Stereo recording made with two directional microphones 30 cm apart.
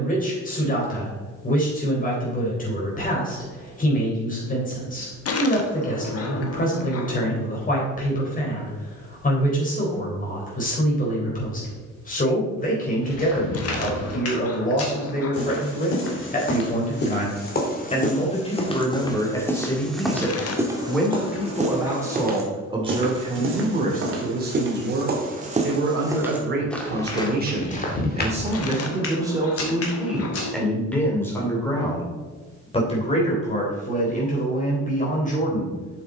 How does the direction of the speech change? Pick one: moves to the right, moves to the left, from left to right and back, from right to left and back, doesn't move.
from left to right and back.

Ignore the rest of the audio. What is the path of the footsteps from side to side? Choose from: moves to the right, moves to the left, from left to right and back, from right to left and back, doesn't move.
from left to right and back.